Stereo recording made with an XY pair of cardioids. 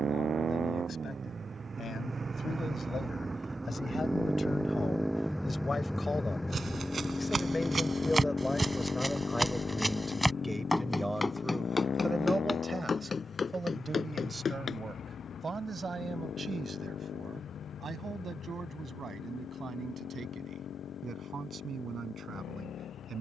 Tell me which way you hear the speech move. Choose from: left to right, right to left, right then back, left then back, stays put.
left to right.